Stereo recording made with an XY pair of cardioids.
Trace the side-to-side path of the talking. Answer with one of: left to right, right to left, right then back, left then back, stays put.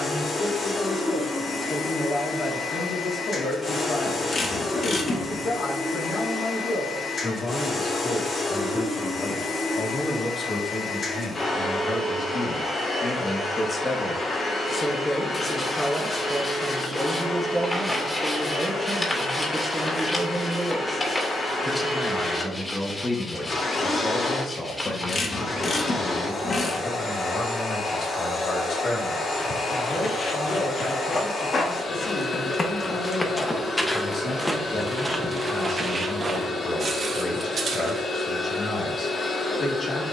right then back.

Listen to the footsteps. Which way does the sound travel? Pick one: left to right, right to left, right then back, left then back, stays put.
left to right.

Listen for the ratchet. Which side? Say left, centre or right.
left.